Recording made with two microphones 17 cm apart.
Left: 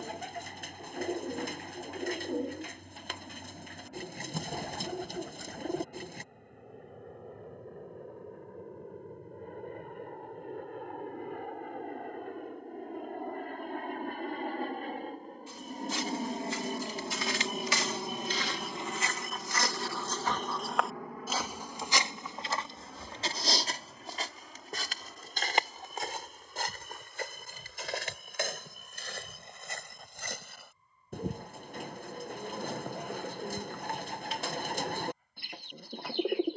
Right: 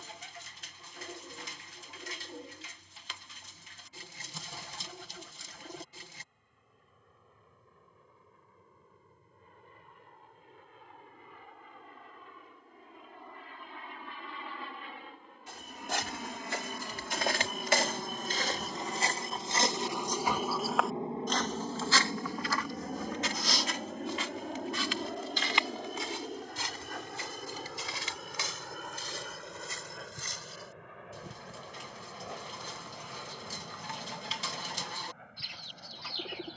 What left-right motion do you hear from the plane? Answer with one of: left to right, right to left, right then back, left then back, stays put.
left to right.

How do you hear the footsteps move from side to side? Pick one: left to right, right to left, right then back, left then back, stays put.
right to left.